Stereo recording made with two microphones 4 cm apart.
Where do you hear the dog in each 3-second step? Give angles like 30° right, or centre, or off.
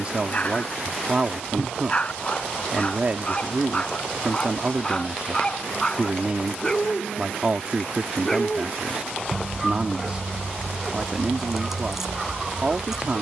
30° left, 20° left, 10° left, centre, 10° right.